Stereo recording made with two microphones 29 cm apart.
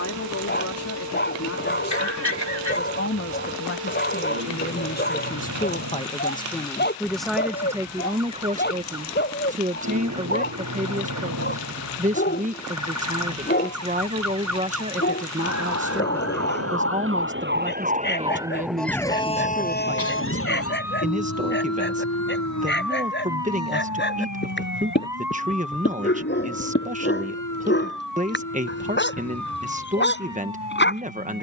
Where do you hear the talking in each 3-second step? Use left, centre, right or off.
left, left, centre, right, right, right, right, right, right, right, right.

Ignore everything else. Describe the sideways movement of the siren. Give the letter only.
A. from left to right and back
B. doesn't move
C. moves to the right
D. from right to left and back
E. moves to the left
E.